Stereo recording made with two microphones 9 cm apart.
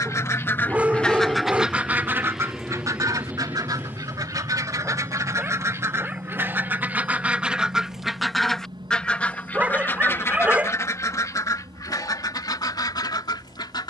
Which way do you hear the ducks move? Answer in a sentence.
You can hear the ducks move from left to right and back again.